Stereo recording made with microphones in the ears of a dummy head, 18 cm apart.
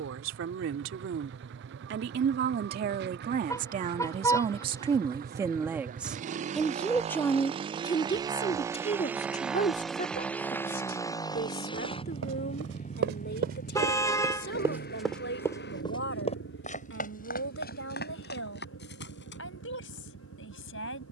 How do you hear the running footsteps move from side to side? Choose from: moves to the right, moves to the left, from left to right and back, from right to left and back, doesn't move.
moves to the left.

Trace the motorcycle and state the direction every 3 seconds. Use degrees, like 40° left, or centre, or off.
60° right, 50° right, 30° right, 10° left, 40° left, 60° left, 70° left.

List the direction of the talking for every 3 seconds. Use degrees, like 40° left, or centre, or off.
60° right, 30° right, 20° left, 40° left, 50° left, 60° left, 60° left.